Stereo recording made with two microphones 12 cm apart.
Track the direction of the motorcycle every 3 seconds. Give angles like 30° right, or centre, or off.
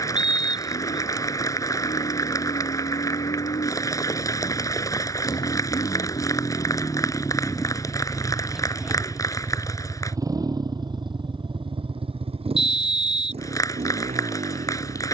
60° left, 50° left, 10° left, 30° right, 60° right.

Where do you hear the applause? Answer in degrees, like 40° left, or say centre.
30° left.